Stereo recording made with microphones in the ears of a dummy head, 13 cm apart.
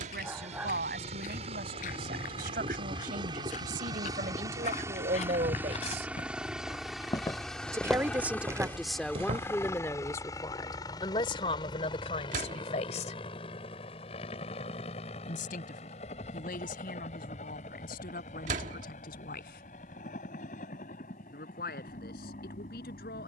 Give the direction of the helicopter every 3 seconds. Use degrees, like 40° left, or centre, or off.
40° right, 20° right, centre, 20° left, 40° left, 50° left, 50° left, 60° left.